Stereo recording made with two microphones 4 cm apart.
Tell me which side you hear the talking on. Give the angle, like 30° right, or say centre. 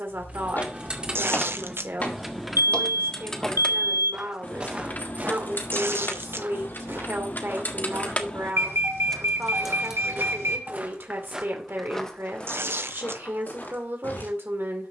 60° right.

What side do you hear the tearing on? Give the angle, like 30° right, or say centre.
70° right.